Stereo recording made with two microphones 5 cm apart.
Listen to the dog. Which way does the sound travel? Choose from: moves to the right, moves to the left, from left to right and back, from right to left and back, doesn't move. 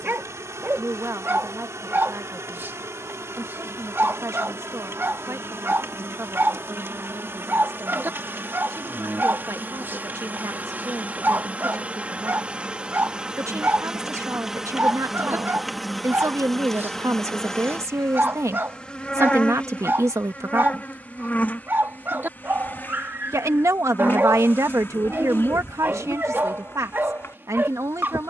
doesn't move.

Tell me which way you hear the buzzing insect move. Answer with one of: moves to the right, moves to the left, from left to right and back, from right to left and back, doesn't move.
moves to the left.